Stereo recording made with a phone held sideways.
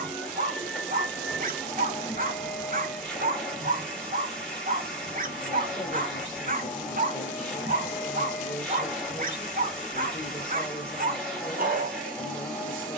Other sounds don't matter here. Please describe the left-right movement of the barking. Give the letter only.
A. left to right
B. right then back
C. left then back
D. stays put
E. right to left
D.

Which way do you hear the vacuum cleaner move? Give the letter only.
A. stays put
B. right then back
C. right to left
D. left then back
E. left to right
A.